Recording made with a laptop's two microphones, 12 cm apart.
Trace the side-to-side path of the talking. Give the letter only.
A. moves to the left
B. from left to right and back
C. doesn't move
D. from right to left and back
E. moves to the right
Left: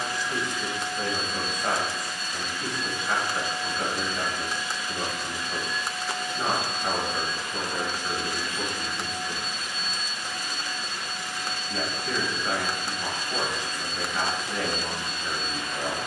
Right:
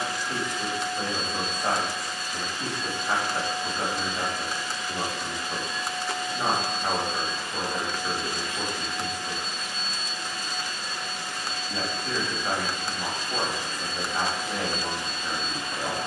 C.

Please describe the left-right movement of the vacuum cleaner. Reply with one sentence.
You can hear the vacuum cleaner stay put.